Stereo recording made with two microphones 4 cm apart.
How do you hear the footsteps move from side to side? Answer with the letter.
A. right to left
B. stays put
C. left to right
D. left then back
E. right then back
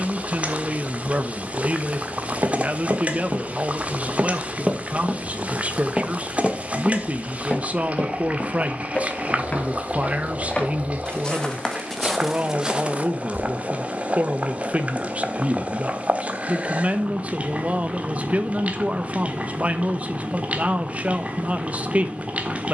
D.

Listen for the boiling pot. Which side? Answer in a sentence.
In this clip you hear the boiling pot on the right.